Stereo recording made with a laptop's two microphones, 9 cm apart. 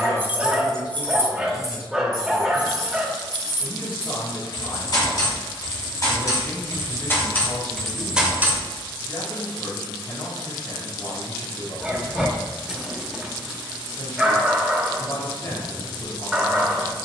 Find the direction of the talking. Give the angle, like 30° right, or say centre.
70° left.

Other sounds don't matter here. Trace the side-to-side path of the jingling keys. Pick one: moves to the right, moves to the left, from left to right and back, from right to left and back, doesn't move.
from right to left and back.